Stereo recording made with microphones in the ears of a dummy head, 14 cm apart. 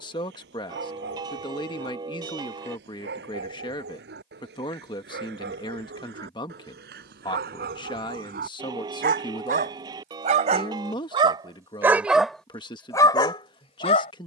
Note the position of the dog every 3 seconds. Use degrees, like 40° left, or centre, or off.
80° right, 80° right, 70° right, 40° right, 20° left.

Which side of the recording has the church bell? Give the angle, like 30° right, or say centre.
30° right.